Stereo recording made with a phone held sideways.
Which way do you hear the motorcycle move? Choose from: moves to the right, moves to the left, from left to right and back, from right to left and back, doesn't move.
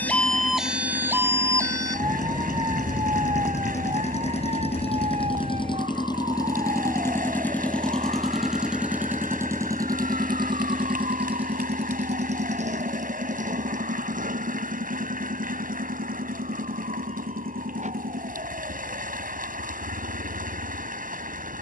moves to the right.